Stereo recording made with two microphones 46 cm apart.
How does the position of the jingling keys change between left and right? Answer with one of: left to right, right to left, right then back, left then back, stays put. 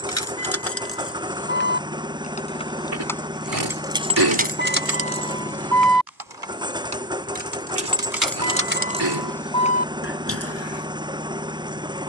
right then back.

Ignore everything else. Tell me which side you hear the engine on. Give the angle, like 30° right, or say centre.
10° right.